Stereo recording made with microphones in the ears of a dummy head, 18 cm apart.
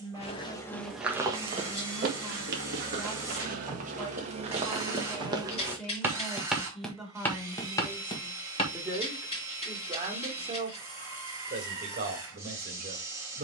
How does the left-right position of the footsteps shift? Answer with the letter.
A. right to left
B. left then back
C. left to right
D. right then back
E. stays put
D.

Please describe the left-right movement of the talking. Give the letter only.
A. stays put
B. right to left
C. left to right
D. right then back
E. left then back
C.